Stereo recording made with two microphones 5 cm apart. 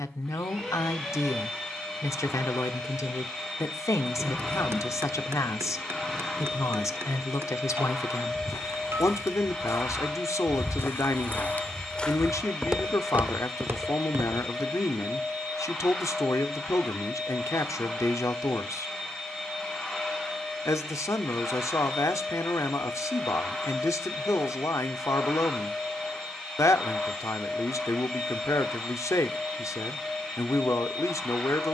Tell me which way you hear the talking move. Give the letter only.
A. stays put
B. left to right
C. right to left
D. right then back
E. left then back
A.